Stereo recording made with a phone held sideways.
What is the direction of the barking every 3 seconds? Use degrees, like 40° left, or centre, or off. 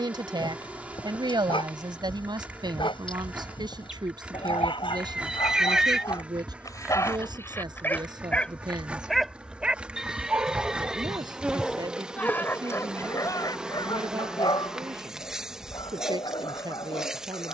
30° left, 30° left, 20° left, centre, 20° left, 30° left.